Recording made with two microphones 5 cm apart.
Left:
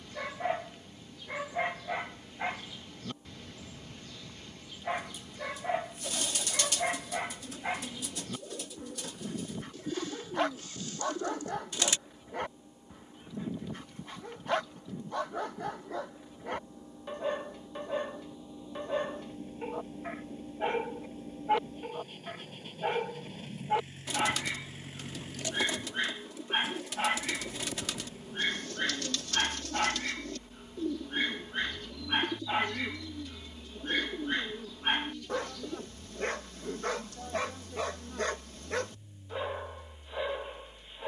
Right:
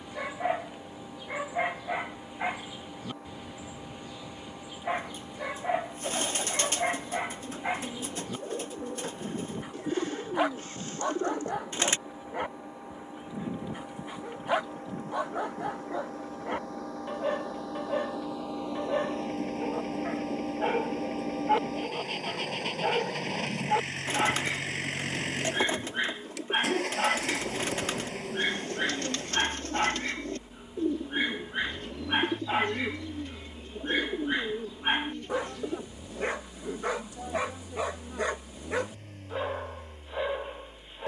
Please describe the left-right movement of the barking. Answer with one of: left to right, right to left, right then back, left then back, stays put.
stays put.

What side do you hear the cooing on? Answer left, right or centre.
right.